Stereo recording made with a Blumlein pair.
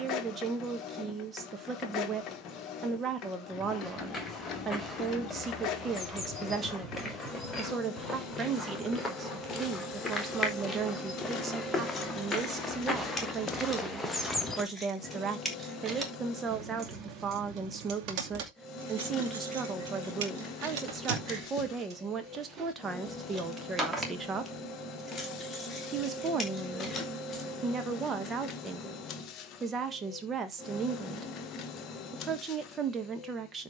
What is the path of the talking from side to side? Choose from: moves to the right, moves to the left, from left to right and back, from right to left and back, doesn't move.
doesn't move.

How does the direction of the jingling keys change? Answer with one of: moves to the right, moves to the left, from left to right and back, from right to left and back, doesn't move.
from left to right and back.